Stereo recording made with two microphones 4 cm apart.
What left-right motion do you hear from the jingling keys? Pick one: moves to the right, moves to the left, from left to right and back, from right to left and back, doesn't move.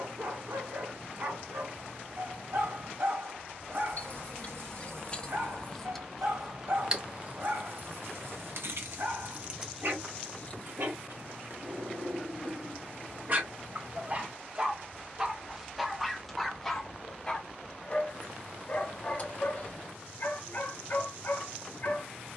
from left to right and back.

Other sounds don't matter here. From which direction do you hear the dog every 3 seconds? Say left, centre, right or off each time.
right, right, right, right, right, centre, left, left.